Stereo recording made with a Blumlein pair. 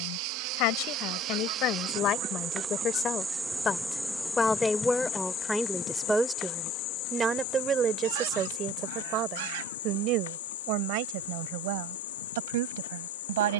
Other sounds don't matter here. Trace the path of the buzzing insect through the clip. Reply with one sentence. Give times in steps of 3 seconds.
You can hear the buzzing insect on the right from 0 s, in the centre from 3 s and on the left from 6 s.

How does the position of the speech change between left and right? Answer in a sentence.
You can hear the speech move from left to right.